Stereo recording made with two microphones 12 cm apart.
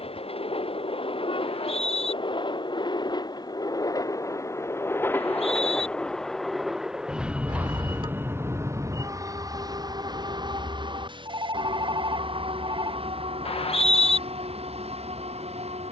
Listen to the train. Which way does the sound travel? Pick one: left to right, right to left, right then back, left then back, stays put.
left to right.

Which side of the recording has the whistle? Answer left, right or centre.
left.